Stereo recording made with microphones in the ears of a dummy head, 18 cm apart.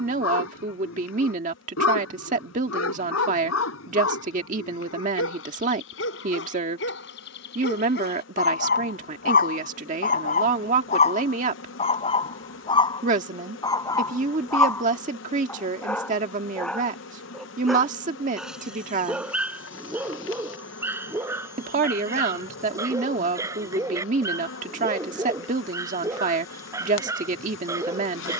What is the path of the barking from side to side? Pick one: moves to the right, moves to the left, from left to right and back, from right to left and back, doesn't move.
moves to the right.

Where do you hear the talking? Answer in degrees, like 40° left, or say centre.
40° right.